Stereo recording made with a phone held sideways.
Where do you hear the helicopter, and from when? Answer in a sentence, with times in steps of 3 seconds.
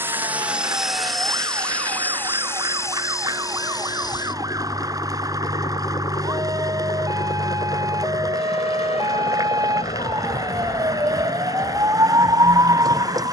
You can hear the helicopter in the centre from 0 s and on the left from 3 s.